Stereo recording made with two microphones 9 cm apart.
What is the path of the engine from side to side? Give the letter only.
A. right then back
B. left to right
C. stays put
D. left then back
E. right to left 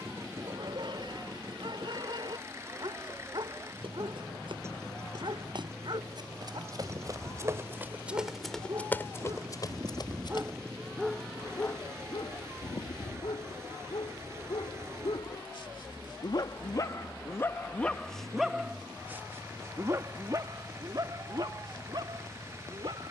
C.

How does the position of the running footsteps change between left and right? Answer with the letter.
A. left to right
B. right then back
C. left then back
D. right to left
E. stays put
D.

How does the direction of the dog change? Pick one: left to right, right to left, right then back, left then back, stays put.
left then back.